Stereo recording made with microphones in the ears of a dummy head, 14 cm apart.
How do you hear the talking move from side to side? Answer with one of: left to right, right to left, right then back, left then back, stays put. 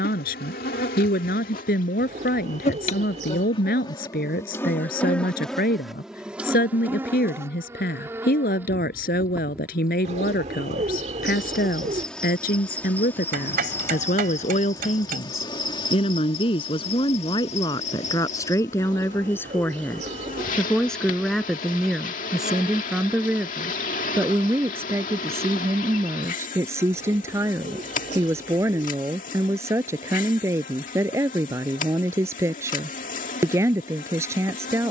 left to right.